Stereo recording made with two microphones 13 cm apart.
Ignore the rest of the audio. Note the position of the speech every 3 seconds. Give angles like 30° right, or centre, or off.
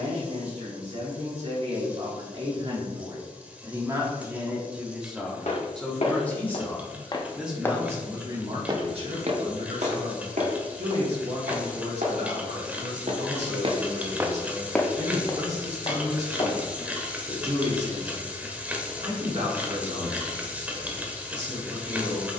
50° right, 10° right, 10° right, 60° right, 60° right, 60° right, 60° right, 60° right.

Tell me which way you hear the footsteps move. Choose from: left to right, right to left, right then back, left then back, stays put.
right then back.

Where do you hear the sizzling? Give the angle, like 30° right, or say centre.
10° right.